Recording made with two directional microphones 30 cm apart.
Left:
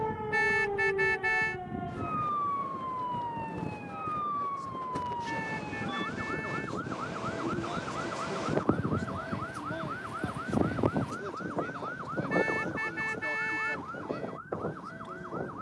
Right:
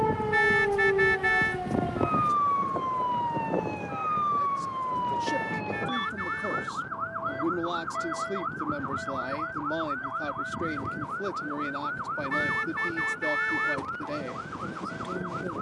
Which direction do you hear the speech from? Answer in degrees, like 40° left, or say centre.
60° right.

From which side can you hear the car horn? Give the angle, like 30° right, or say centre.
20° right.